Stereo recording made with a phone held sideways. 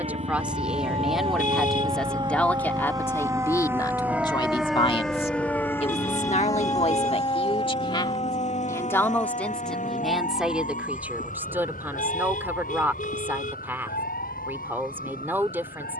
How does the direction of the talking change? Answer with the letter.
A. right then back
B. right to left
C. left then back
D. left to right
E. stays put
C.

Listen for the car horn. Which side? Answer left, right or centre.
left.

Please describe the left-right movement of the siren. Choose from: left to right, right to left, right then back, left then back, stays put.
right to left.